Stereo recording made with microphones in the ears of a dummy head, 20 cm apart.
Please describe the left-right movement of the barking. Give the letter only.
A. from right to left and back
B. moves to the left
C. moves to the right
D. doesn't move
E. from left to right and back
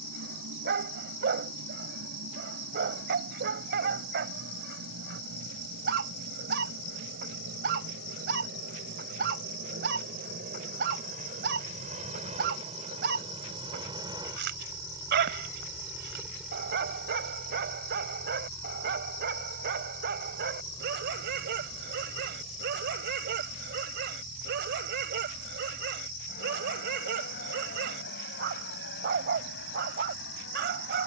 D.